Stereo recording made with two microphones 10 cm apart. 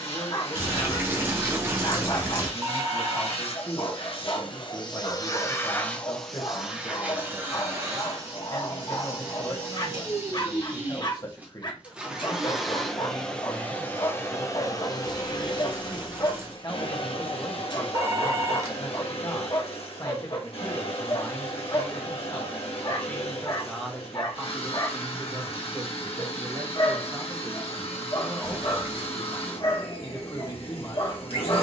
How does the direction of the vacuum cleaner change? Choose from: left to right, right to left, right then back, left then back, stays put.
right then back.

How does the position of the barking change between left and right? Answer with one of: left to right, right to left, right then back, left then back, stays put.
stays put.